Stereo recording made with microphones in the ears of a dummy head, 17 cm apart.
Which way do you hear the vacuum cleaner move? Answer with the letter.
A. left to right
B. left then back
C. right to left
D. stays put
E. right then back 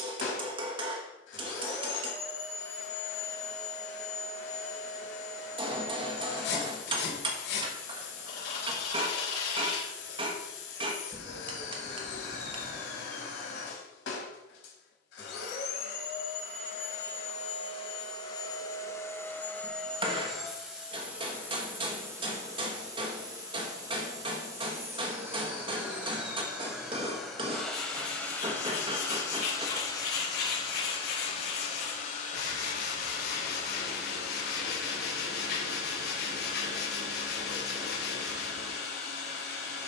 E.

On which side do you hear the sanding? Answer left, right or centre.
left.